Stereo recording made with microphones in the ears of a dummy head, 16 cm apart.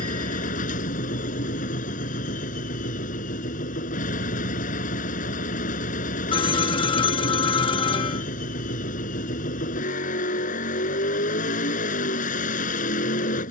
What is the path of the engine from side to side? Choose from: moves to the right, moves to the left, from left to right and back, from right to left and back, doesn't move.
doesn't move.